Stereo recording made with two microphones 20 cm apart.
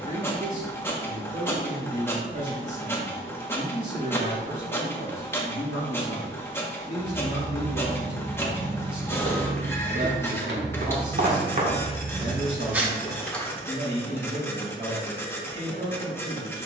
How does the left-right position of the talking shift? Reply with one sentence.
In this clip you hear the talking stay put.